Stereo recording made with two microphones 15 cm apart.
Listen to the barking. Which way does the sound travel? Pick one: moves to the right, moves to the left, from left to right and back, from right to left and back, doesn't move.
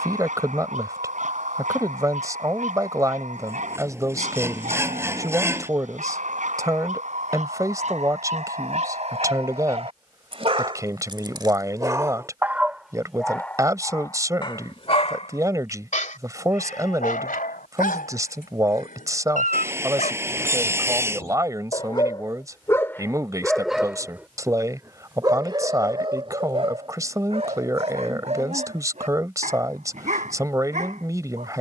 from right to left and back.